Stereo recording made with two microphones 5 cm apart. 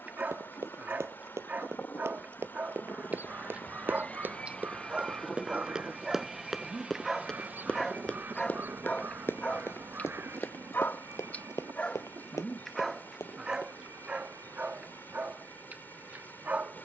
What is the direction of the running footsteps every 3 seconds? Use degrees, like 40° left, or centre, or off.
50° right, 30° right, 10° left, 50° left, 70° left, off.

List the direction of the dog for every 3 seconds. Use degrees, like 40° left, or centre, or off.
30° right, 20° right, centre, 30° left, 10° right, 30° right.